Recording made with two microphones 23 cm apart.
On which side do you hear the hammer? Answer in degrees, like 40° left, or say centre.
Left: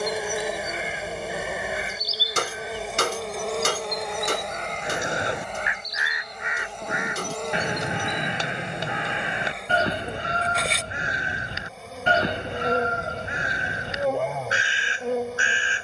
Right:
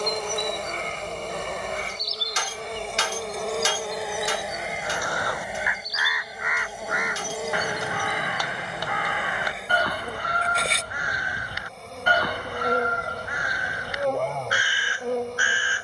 60° left.